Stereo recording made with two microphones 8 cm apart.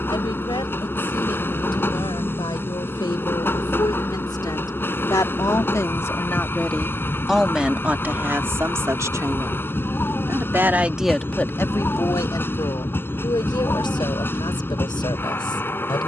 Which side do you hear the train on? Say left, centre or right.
left.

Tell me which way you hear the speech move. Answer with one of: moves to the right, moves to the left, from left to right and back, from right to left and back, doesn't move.
from left to right and back.